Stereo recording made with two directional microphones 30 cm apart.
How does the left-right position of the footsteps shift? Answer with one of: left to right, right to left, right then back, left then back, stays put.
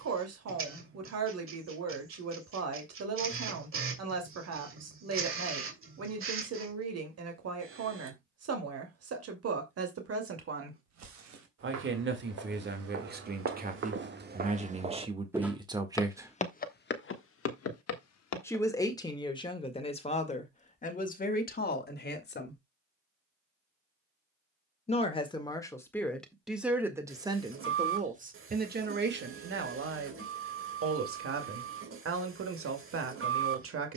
right to left.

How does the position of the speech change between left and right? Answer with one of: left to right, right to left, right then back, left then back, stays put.
left then back.